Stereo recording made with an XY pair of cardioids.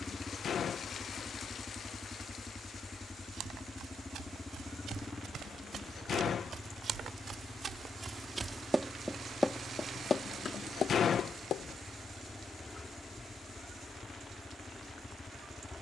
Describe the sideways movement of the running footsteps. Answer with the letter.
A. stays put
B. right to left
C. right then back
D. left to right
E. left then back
B.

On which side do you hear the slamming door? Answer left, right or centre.
left.